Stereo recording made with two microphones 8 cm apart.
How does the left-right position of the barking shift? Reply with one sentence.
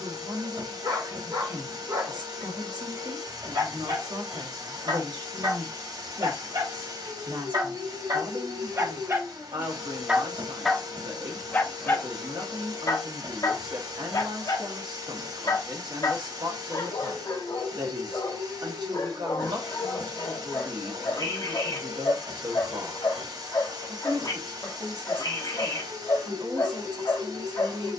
You can hear the barking move from right to left.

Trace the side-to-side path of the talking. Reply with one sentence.
You can hear the talking stay in one place.